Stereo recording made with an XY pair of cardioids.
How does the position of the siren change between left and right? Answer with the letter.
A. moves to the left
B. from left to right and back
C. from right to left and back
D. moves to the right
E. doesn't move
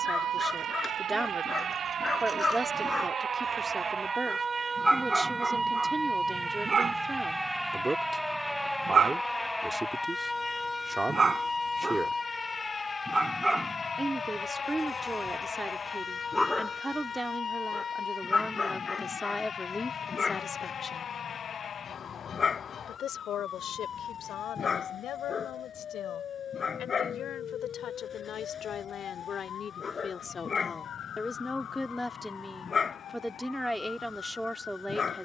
A.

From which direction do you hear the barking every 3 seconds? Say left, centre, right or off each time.
left, centre, right, right, centre, centre, left, left, left, left, left, left.